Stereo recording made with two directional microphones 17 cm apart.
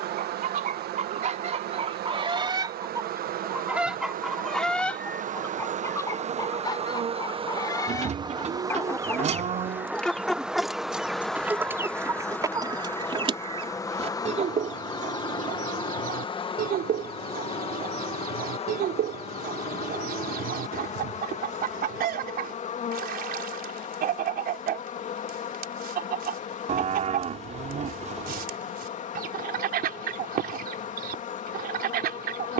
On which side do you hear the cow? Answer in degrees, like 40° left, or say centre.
40° right.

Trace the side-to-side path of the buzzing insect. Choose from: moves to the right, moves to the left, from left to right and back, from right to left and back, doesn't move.
moves to the left.